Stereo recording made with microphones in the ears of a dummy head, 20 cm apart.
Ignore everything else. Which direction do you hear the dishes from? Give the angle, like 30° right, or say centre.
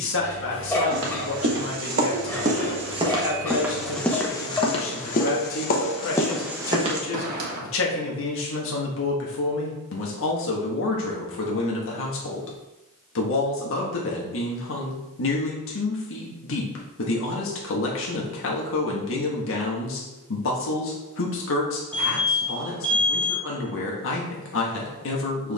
10° left.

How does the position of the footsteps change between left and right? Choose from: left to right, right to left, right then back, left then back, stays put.
left then back.